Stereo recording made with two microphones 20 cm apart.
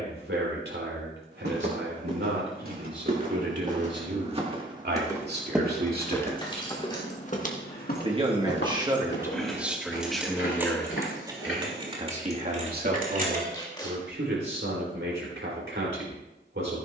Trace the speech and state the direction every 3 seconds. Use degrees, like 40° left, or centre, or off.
70° right, 60° right, 30° right, centre, 60° right, 70° right.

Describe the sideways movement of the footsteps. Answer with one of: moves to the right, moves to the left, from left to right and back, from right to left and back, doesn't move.
moves to the left.